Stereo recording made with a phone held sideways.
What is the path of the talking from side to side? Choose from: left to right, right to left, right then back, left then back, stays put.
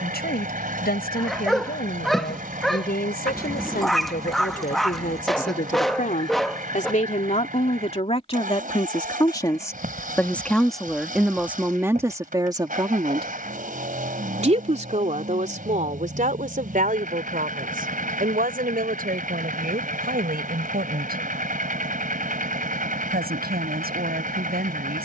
left to right.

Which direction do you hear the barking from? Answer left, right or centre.
centre.